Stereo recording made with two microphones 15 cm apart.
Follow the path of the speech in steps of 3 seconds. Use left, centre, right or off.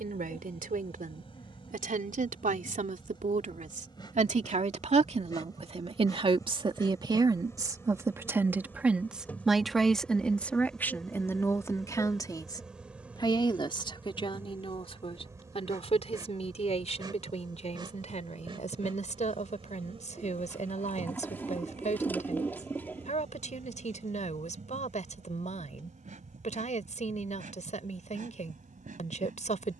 right, right, right, centre, left, left, left, left, left, left.